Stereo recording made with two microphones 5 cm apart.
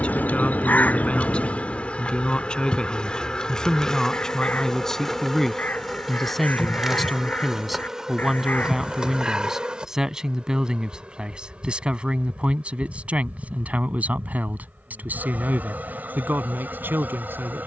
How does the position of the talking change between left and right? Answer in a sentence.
You can hear the talking move to the right.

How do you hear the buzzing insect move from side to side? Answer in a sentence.
In this clip you hear the buzzing insect go from the left side to the right.